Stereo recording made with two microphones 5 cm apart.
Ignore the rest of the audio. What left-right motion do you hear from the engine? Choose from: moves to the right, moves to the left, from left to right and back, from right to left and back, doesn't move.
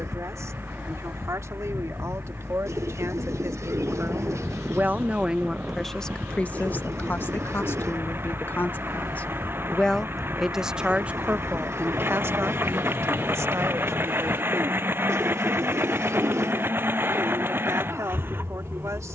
doesn't move.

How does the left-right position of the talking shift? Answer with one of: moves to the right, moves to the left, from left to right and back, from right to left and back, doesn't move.
from right to left and back.